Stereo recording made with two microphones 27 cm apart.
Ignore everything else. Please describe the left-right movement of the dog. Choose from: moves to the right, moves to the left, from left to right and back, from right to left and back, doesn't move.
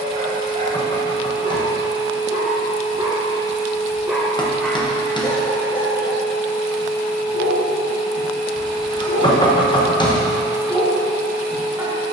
from right to left and back.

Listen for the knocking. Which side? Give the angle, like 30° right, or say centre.
20° left.